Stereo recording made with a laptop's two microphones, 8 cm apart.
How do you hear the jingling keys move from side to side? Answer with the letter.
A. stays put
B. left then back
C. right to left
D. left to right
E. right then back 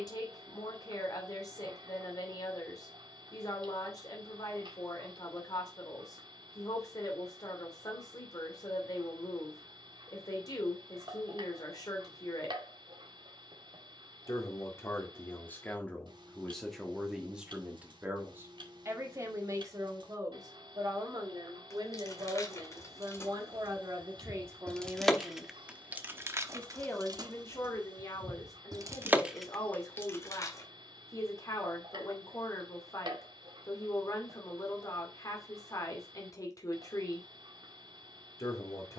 E.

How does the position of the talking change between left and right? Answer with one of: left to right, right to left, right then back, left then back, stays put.
right then back.